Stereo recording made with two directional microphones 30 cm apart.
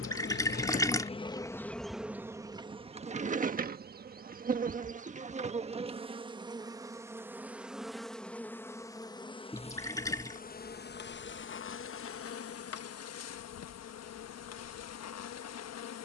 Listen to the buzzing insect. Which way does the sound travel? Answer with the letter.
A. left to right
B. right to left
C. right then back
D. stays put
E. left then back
C.